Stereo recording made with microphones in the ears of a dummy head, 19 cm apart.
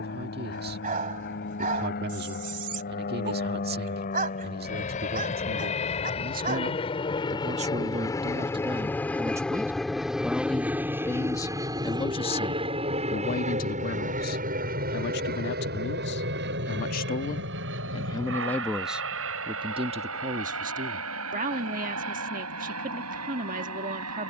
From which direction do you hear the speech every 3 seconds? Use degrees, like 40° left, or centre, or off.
50° right, 50° right, 30° right, centre, 40° left, 50° left, 20° right, 40° right.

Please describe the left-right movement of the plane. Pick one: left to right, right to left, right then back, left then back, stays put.
left to right.